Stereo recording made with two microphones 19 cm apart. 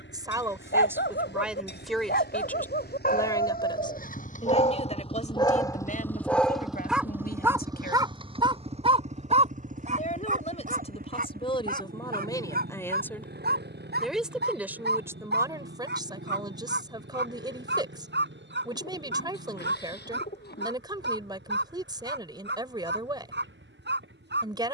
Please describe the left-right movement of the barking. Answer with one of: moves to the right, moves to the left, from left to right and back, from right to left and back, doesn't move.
moves to the right.